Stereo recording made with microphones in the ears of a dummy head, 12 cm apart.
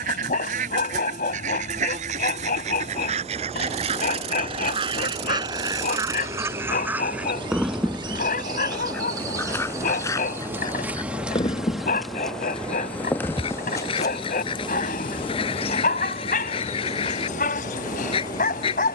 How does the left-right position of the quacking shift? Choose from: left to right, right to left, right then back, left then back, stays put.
right to left.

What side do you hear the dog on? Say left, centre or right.
left.